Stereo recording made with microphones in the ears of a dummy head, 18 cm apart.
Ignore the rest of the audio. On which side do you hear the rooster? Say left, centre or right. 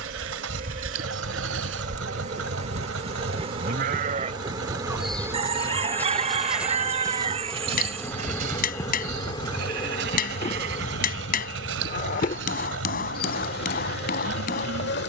right.